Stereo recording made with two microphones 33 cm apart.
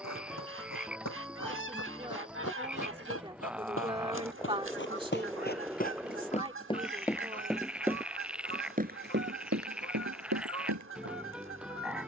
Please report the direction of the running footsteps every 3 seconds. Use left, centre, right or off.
left, left, centre, right.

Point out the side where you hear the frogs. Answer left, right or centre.
centre.